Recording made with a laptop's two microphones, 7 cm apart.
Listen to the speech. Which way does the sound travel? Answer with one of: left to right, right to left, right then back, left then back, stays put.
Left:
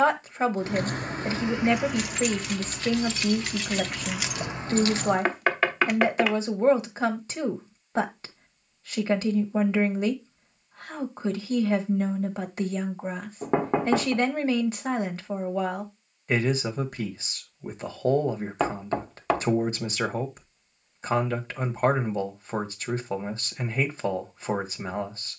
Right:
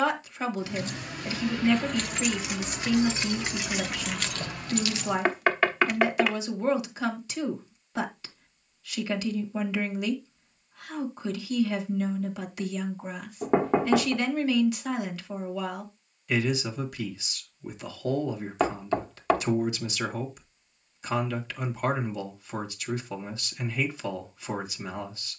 stays put.